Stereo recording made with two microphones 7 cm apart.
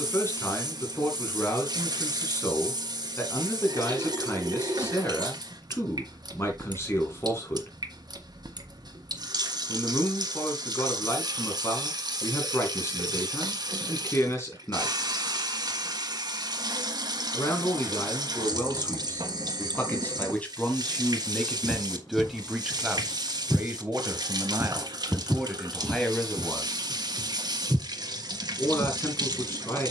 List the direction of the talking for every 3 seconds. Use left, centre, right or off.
left, left, left, left, left, left, left, centre, centre, left.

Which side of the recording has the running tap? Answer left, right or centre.
right.